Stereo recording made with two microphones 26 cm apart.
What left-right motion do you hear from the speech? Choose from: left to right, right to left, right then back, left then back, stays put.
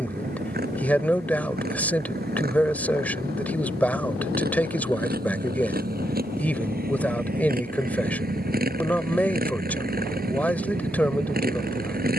stays put.